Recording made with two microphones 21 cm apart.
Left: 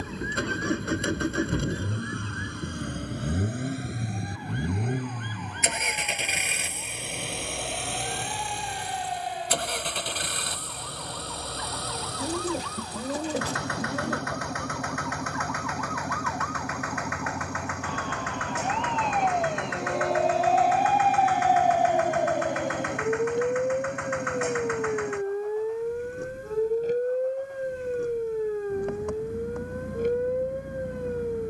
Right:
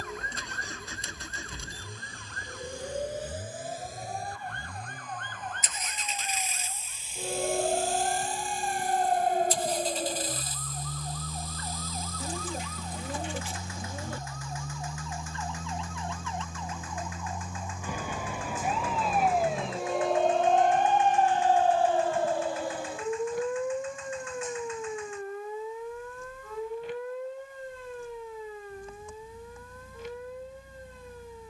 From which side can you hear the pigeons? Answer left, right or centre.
left.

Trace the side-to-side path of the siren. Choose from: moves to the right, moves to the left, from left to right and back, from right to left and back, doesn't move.
moves to the left.